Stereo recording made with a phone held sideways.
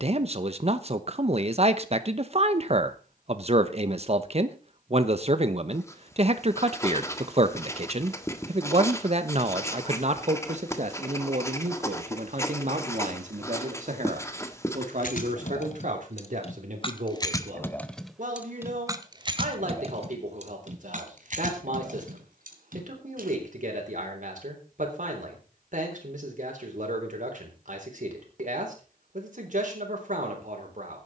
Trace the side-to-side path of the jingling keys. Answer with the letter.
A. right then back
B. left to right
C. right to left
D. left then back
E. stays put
B.